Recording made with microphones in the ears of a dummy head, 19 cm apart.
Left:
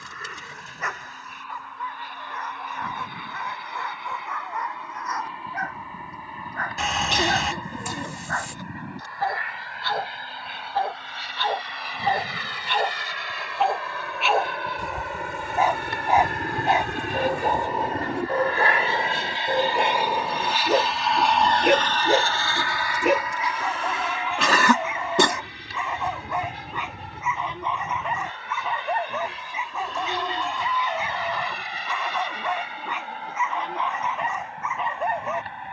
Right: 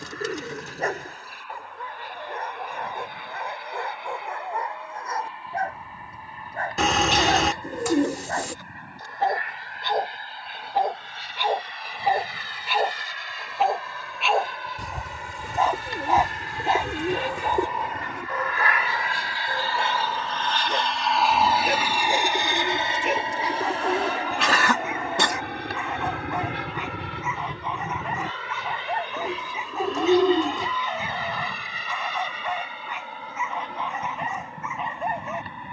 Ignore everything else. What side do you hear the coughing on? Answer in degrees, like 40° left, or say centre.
80° left.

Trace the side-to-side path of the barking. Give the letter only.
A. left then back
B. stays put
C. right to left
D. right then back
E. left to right
C.